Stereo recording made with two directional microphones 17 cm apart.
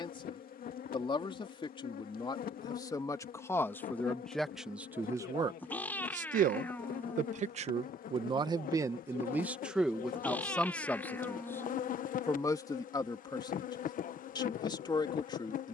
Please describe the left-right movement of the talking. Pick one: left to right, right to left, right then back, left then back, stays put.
right then back.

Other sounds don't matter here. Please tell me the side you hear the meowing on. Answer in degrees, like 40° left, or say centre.
10° left.